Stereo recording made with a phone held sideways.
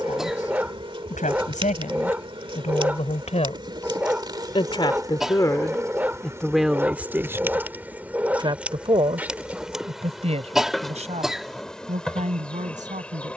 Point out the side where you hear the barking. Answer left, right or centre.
centre.